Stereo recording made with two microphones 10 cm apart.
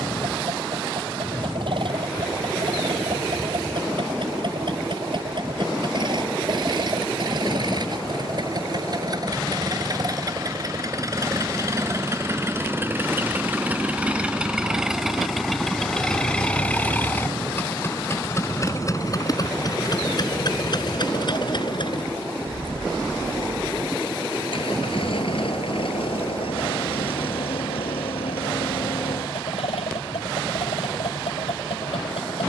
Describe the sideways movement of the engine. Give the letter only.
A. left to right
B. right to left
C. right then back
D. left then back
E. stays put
B.